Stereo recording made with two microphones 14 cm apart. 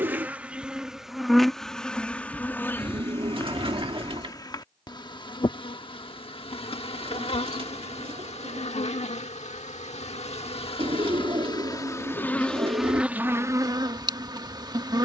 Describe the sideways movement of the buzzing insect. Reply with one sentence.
In this clip you hear the buzzing insect move from right to left and back again.